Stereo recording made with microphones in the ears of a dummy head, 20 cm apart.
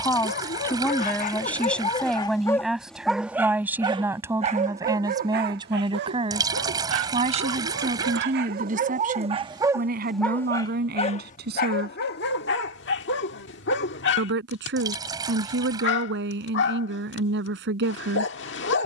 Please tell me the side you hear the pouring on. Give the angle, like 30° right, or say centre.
20° right.